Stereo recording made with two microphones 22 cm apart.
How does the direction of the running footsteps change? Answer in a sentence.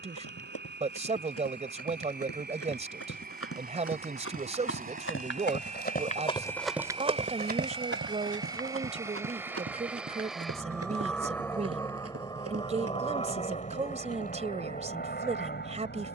In this clip you hear the running footsteps move to the right.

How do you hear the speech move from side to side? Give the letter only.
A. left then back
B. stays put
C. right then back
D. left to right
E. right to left
B.